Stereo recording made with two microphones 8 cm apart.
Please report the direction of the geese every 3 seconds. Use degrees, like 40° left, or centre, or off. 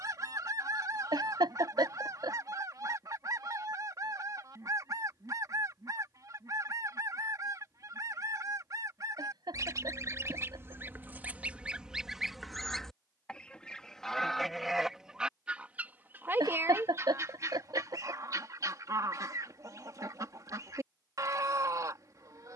50° right, 50° right, 50° right, 30° right, centre, 30° right, 50° right, 50° right.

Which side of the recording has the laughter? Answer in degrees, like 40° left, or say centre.
70° right.